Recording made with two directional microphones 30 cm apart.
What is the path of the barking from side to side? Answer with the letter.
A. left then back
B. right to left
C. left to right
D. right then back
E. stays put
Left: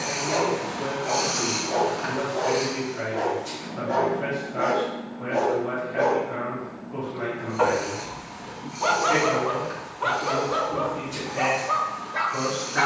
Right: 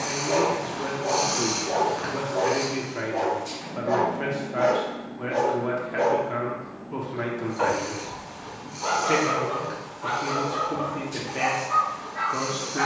B.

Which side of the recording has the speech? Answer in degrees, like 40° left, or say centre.
60° right.